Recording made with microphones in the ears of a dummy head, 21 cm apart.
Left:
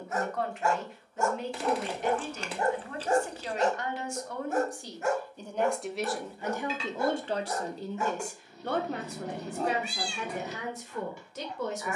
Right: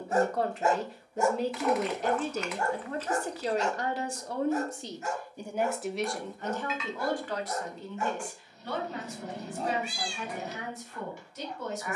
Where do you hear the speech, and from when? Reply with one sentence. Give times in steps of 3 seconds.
In this clip you hear the speech on the right from 0 s and on the left from 6 s.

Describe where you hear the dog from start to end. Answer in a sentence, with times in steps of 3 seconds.
In this clip you hear the dog in the centre from 0 s and on the left from 3 s.